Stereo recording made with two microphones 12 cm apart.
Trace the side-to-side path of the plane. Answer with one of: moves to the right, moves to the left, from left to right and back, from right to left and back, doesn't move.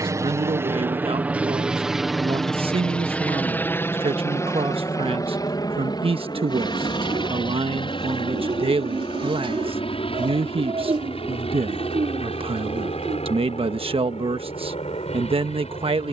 moves to the left.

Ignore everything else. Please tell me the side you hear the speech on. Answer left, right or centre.
right.